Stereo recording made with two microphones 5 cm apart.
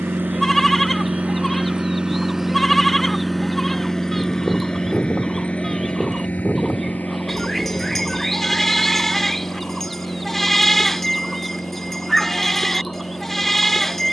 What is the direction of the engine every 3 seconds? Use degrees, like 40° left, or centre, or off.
30° right, 20° left, 40° left, 50° left, 60° left.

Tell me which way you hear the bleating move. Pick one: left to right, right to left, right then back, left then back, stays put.
stays put.